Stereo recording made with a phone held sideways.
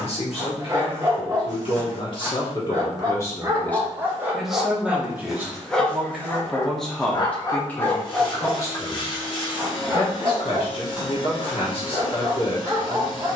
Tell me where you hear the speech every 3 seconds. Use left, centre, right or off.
left, centre, centre, left, left.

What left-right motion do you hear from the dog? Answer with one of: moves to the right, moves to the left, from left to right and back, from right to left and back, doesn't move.
from right to left and back.